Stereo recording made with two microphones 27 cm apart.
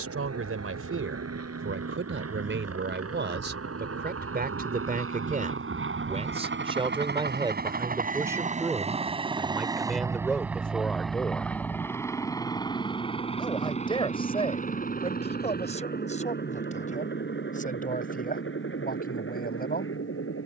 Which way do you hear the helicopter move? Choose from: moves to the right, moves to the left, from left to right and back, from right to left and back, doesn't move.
moves to the left.